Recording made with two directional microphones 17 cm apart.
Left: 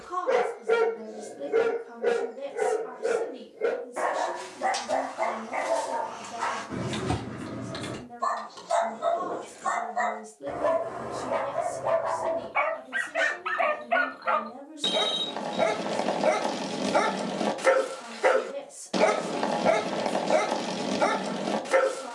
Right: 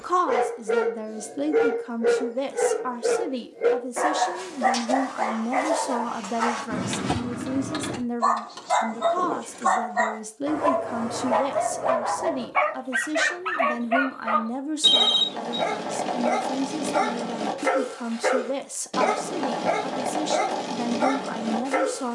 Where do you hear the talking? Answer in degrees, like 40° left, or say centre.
60° right.